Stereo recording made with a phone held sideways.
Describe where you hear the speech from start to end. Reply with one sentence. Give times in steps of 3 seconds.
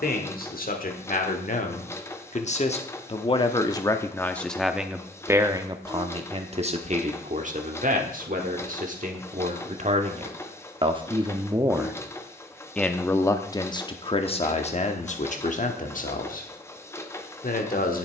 You can hear the speech on the left from 0 s, in the centre from 3 s, on the right from 6 s and on the left from 12 s.